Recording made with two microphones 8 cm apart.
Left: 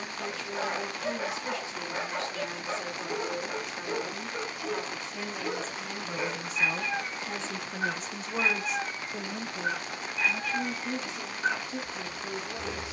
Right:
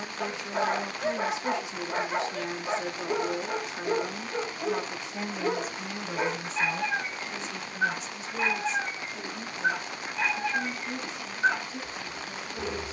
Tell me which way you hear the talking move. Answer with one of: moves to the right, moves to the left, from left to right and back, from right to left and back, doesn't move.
moves to the left.